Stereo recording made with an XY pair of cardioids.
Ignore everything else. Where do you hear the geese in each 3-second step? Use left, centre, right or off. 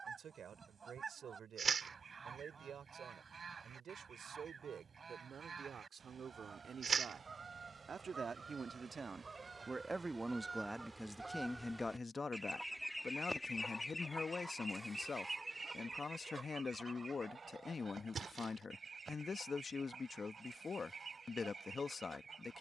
right, right, right, right, centre, right, right, right.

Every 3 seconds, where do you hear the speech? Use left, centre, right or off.
right, right, right, centre, left, left, left, left.